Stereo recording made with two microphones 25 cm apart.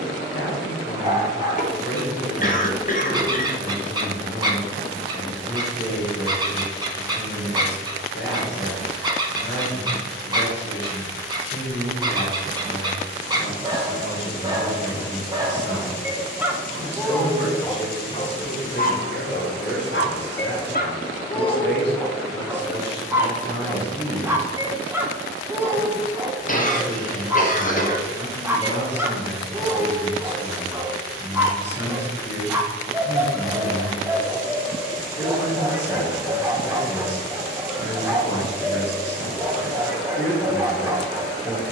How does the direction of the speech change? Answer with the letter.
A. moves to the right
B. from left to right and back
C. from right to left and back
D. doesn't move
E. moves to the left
D.